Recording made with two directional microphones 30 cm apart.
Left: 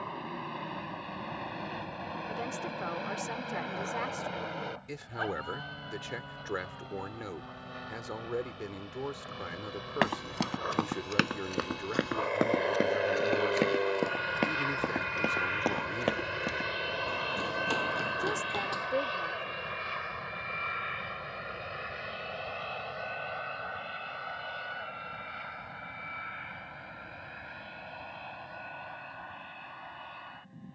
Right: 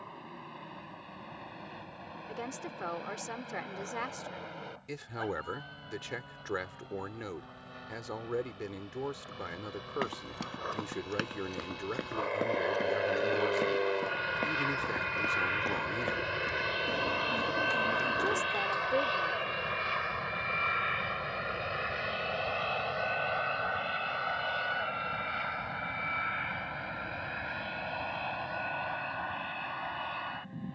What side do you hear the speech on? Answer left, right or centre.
centre.